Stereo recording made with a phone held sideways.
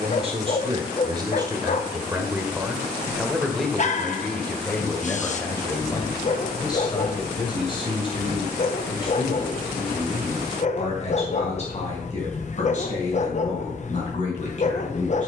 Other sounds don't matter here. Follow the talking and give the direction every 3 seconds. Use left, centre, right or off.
right, centre, left, left, left.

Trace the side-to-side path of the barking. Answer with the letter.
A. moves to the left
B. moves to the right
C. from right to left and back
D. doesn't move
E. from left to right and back
D.